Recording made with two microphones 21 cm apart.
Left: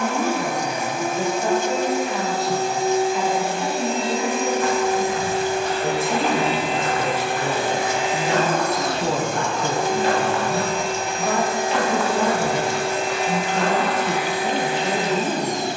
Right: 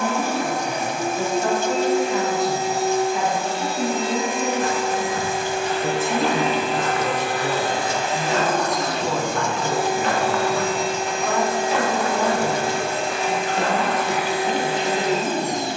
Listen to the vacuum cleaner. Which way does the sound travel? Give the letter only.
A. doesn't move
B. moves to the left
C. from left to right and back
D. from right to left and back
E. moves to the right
D.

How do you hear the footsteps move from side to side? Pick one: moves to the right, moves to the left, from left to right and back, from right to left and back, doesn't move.
from right to left and back.